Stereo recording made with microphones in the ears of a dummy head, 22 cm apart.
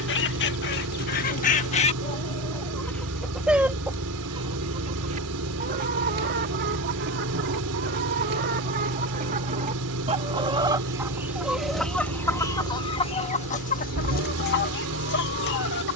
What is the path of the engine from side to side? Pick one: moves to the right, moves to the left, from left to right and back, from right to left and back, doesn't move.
doesn't move.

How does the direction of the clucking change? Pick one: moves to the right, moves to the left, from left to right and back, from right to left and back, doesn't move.
from left to right and back.